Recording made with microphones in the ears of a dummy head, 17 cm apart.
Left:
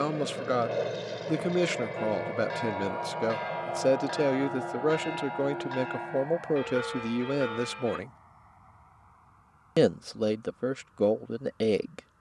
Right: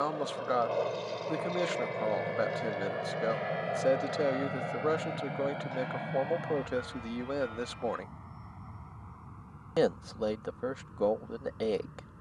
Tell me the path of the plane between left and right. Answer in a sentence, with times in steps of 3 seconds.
In this clip you hear the plane in the centre from 0 s and on the right from 3 s.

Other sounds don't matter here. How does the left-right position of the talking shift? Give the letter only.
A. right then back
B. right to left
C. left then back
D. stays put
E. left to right
D.